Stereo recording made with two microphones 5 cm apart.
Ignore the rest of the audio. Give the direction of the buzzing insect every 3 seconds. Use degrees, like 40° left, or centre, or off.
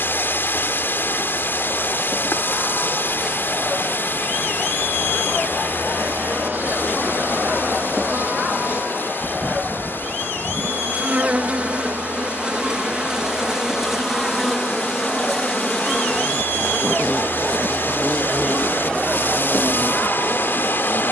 20° left, 20° right, 50° right, 30° right, 10° right, 10° left, 30° left.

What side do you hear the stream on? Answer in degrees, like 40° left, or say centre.
50° left.